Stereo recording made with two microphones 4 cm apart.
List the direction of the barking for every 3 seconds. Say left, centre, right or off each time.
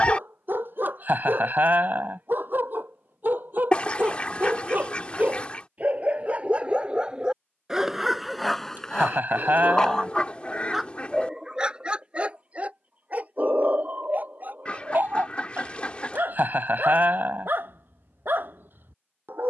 right, right, centre, centre, right, right, right.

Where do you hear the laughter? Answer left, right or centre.
right.